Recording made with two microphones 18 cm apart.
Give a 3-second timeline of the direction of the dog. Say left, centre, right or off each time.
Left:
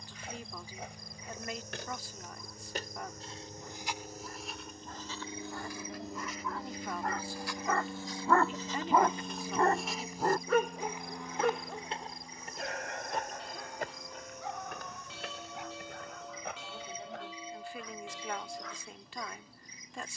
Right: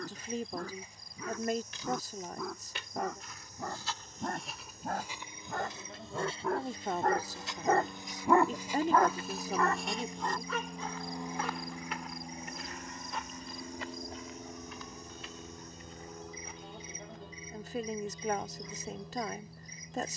right, right, right, left, left, left, left.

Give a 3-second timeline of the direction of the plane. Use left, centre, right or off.
left, left, left, centre, right, right, right.